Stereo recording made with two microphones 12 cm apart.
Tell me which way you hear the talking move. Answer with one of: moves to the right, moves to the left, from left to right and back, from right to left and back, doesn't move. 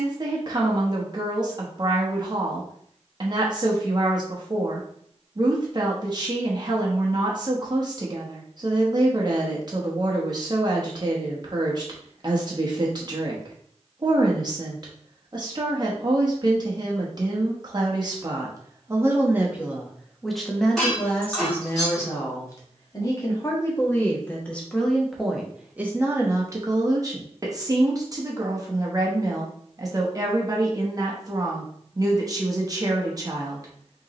from right to left and back.